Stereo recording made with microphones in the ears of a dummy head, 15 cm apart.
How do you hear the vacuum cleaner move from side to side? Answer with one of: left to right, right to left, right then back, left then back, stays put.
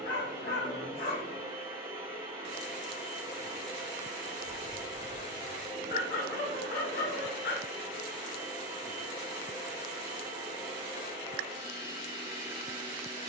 stays put.